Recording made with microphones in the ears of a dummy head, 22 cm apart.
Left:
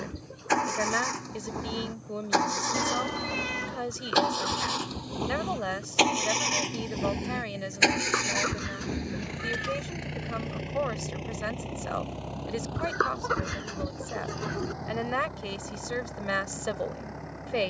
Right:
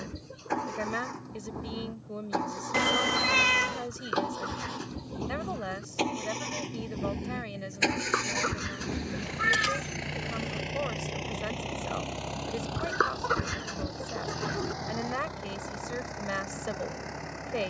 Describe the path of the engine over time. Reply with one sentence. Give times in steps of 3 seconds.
In this clip you hear the engine on the left from 0 s and on the right from 9 s.